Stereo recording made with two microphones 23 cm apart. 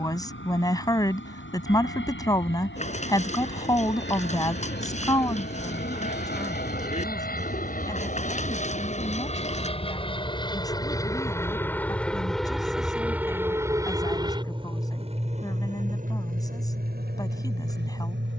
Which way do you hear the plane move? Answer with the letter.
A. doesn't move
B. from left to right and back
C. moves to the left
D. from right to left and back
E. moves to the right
E.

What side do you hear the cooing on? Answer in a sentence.
In this clip you hear the cooing on the left.